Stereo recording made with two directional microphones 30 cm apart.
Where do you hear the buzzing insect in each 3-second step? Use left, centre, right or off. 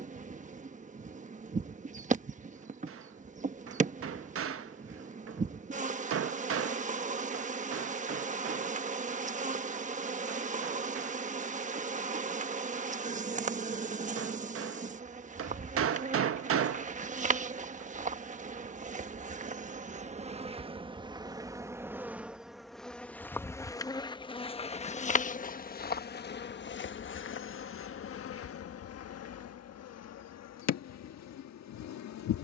right, right, right, right, right, right, right, centre, left, left, left.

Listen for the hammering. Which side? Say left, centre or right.
right.